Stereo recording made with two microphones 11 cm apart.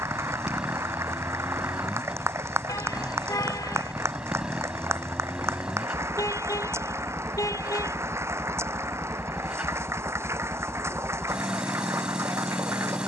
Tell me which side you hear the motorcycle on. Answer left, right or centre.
centre.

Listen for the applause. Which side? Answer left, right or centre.
right.